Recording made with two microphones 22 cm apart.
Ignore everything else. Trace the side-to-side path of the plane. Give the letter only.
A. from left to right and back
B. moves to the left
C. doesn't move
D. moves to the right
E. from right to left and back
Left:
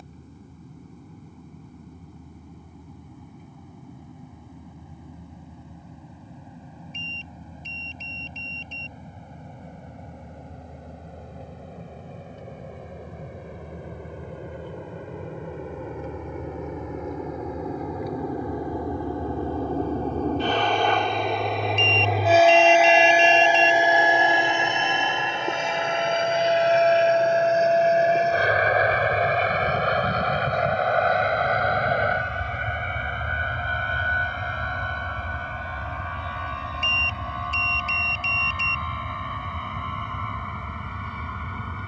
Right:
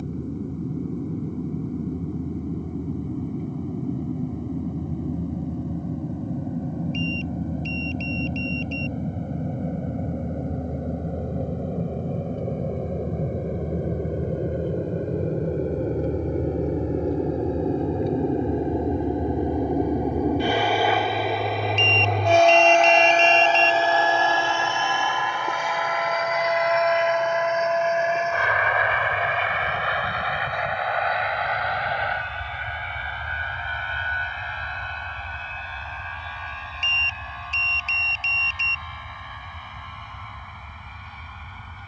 B.